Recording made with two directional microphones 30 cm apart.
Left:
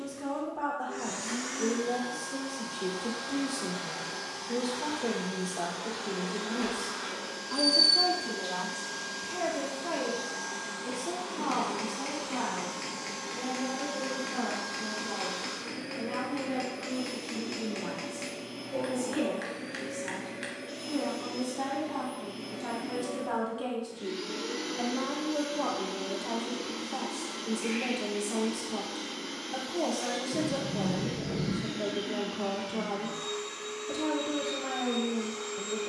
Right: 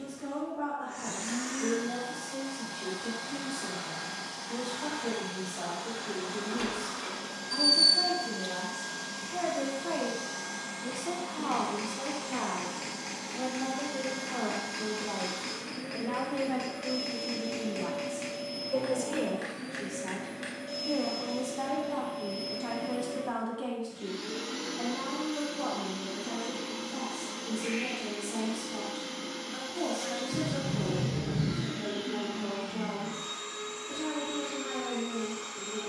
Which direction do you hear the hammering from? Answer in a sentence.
You can hear the hammering in the centre.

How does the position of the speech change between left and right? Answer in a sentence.
You can hear the speech move from left to right and back again.